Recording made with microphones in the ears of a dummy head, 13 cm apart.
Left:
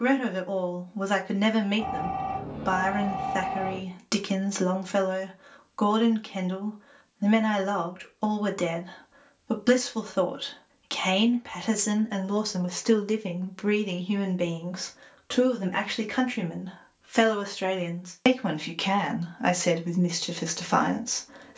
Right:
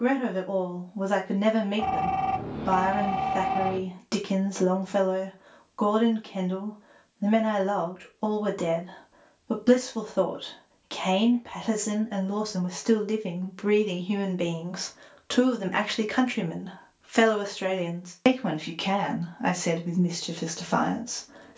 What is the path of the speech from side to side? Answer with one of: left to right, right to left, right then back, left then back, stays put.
right then back.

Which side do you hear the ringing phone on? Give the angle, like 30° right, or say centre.
50° right.